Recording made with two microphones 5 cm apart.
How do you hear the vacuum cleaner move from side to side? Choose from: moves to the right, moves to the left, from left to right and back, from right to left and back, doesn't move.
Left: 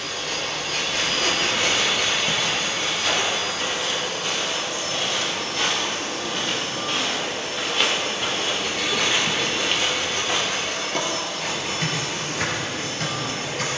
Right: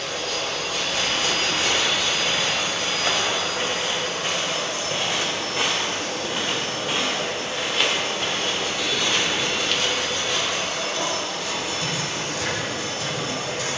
doesn't move.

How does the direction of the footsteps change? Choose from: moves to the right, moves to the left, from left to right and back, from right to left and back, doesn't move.
moves to the left.